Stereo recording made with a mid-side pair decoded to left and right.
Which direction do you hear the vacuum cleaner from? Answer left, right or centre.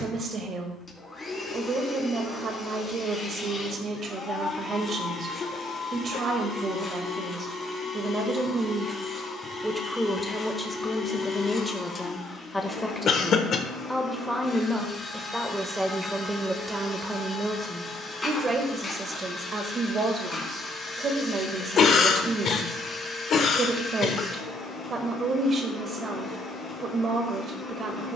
left.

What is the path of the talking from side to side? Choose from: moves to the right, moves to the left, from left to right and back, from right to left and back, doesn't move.
from right to left and back.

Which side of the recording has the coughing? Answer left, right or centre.
left.